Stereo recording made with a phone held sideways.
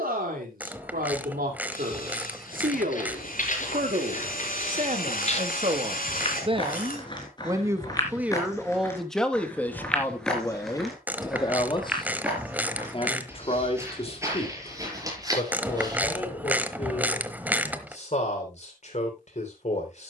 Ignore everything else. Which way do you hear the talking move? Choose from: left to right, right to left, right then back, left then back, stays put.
right to left.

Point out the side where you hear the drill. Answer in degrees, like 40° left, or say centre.
70° left.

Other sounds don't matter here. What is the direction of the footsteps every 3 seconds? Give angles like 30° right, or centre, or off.
60° left, 50° left, 30° left, centre, 20° right, 20° right, off.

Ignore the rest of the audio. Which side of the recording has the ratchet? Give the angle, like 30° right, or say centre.
10° right.